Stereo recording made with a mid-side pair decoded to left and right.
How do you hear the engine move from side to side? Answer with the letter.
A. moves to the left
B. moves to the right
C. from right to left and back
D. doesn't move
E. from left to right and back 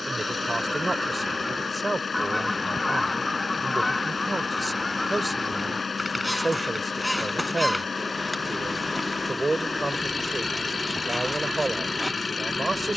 D.